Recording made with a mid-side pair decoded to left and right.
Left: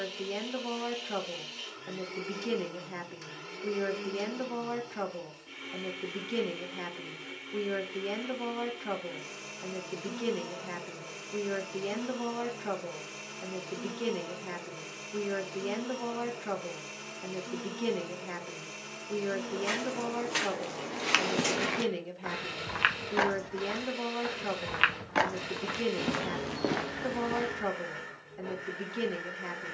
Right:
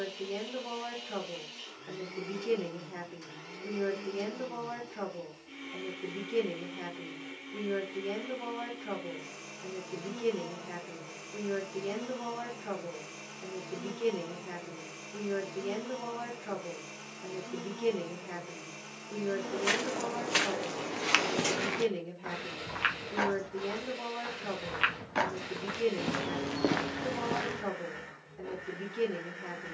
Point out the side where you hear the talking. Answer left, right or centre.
left.